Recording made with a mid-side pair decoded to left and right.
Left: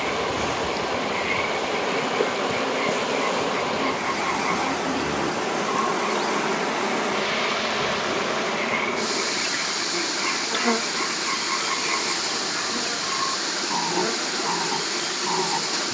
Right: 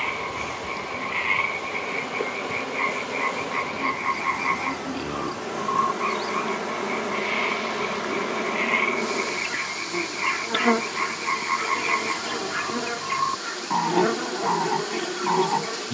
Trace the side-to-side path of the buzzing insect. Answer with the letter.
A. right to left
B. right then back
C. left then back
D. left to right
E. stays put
D.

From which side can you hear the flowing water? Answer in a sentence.
You can hear the flowing water on the left.